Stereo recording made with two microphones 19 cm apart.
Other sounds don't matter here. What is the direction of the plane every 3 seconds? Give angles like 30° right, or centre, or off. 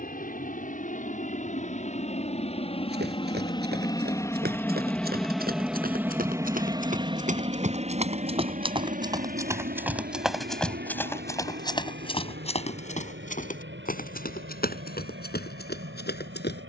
40° left, 10° left, 30° right, 50° right, 70° right, 70° right.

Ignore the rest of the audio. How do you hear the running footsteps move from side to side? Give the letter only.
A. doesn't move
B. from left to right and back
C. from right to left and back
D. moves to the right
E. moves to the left
E.